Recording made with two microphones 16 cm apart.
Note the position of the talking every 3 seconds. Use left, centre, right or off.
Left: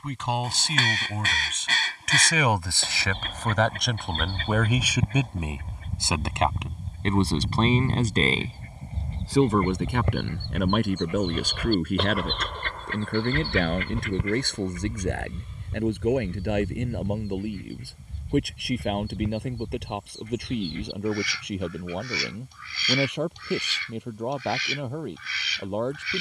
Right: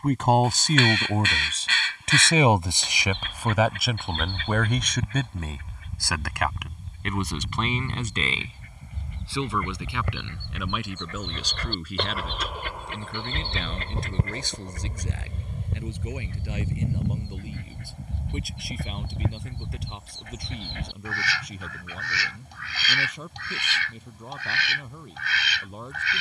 right, centre, left, left, left, left, left, left, left.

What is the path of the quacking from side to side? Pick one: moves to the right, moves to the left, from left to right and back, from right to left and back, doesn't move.
moves to the right.